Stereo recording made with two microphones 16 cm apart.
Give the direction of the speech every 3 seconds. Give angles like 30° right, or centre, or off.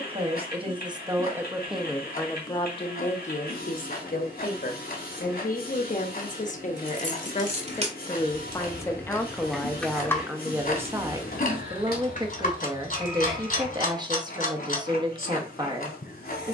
10° right, 60° left, 40° left, 10° right, 30° right, 30° right.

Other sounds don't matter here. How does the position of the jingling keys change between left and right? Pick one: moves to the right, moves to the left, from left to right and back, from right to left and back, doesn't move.
moves to the left.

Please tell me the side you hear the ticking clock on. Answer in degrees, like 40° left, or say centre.
60° left.